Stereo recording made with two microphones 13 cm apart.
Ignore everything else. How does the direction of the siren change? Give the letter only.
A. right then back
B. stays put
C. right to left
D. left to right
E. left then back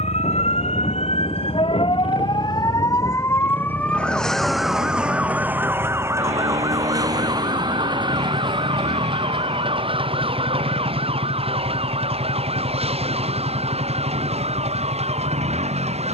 D.